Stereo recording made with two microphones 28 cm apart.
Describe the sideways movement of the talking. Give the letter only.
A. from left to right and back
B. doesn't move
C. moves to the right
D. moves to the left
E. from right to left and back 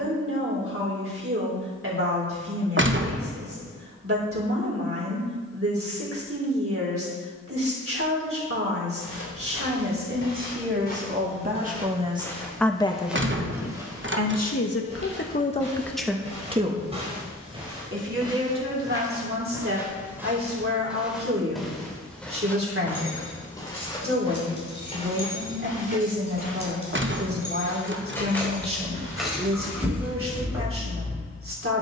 E.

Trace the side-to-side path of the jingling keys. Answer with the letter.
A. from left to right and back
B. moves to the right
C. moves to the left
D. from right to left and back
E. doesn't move
B.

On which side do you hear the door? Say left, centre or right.
right.